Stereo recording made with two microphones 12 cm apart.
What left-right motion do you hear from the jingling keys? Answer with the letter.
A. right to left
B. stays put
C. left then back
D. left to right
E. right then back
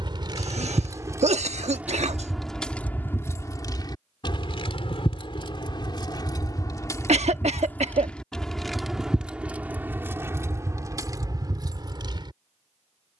C.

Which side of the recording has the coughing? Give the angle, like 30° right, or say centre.
70° right.